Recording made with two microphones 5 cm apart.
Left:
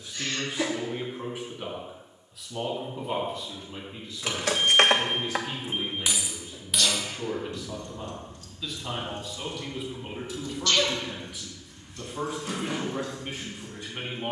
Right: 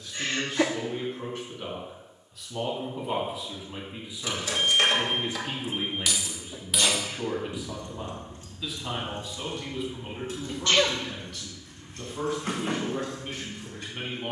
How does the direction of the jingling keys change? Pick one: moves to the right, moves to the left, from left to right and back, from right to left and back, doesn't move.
moves to the right.